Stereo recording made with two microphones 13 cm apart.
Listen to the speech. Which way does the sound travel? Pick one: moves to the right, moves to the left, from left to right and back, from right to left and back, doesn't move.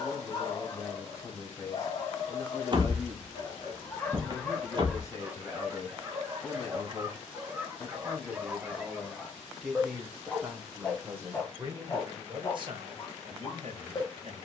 moves to the right.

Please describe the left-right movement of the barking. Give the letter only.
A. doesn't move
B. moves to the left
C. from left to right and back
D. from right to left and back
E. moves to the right
C.